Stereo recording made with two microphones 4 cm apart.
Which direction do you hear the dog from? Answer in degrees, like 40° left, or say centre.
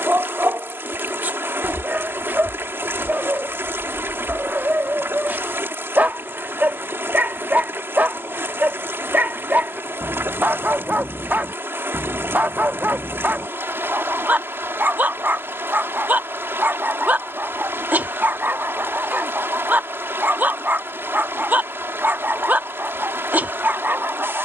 40° right.